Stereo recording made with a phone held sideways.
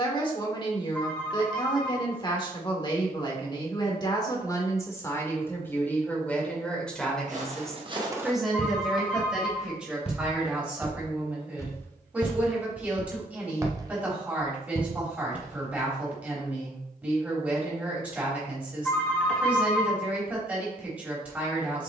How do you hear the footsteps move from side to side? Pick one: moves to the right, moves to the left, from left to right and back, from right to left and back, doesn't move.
from right to left and back.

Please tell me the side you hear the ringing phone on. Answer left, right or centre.
centre.